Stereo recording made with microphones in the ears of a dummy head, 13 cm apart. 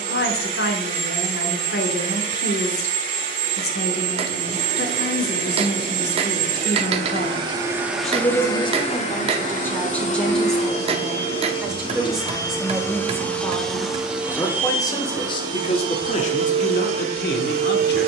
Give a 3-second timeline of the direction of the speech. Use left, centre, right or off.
left, left, left, centre, centre, left.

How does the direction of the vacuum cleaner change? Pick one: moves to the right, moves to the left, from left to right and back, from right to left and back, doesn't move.
from right to left and back.